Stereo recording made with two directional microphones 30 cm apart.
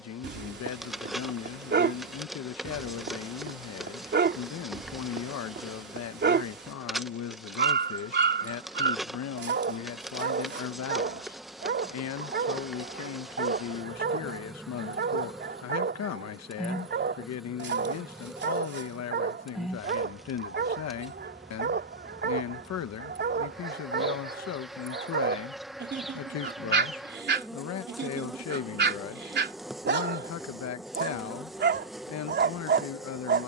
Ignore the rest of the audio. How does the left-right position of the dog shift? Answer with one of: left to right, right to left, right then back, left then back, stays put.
stays put.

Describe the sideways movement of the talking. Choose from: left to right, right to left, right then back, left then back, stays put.
stays put.